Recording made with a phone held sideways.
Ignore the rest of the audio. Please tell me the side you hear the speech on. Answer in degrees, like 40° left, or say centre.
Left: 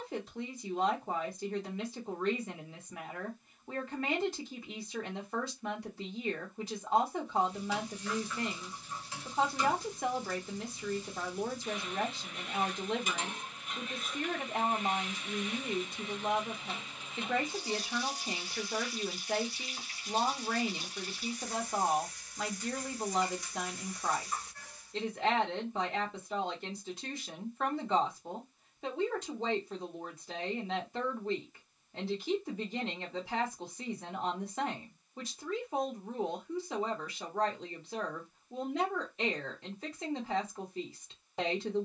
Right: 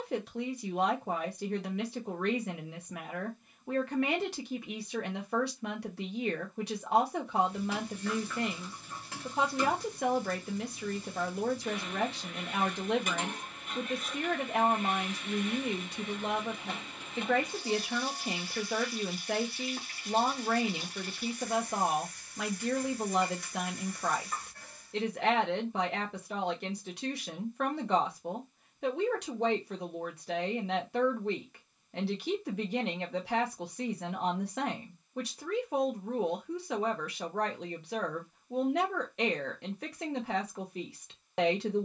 70° right.